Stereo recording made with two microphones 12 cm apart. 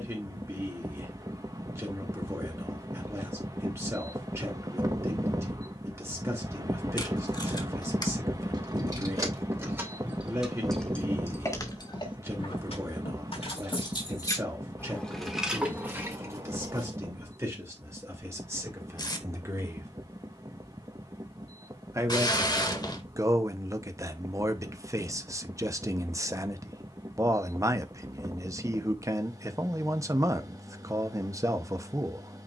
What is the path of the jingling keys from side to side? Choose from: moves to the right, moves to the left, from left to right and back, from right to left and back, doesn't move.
from right to left and back.